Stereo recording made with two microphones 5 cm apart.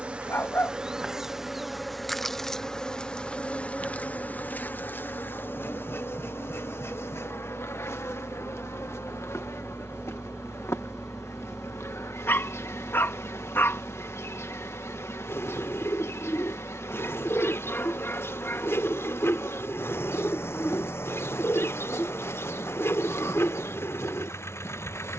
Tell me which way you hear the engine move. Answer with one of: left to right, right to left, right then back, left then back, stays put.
right to left.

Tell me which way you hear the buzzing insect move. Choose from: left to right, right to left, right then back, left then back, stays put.
right to left.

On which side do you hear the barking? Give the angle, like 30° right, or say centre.
50° left.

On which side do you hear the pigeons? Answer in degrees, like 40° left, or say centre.
60° left.